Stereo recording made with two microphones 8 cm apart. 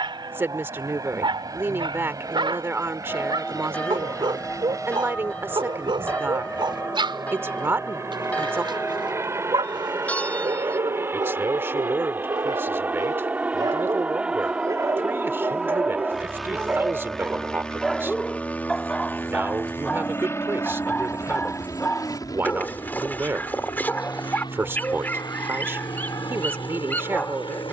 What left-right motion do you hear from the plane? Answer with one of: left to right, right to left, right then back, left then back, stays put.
right to left.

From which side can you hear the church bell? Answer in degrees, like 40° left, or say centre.
20° left.